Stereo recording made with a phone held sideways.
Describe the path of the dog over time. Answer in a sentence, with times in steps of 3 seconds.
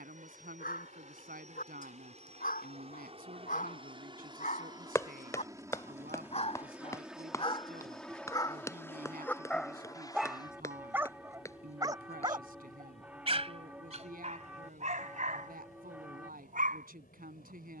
In this clip you hear the dog on the left from 0 s, in the centre from 9 s and on the right from 12 s.